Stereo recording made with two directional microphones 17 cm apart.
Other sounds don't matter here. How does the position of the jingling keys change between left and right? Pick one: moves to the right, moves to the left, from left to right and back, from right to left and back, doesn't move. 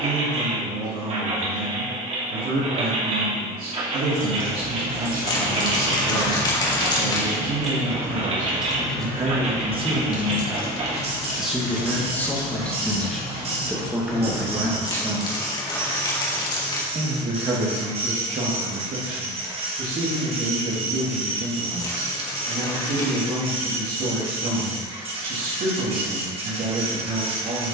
moves to the left.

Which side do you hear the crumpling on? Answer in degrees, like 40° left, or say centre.
20° left.